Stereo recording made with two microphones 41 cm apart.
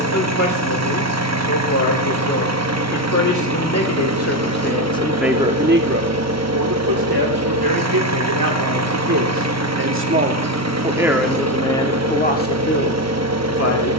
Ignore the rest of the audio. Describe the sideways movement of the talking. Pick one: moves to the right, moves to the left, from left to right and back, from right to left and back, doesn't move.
from left to right and back.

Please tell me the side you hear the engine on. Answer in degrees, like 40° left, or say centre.
40° right.